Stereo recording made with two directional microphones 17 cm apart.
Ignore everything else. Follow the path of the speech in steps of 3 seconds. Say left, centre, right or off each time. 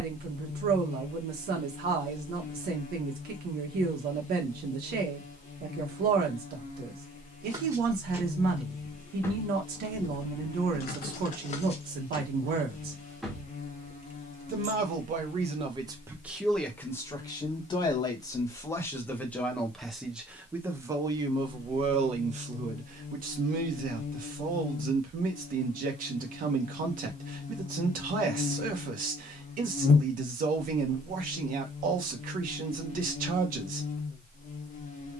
right, right, right, right, right, centre, centre, right, right, right, right, right.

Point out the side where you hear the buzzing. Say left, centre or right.
left.